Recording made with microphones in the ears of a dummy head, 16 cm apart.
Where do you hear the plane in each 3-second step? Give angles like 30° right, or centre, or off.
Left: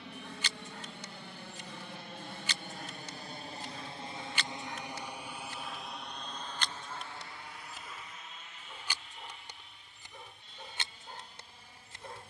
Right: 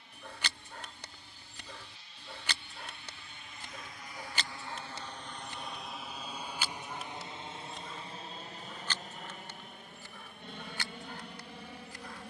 50° left, 20° left, 20° right, 40° right.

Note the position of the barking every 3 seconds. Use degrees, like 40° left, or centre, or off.
50° right, 30° right, centre, 20° left.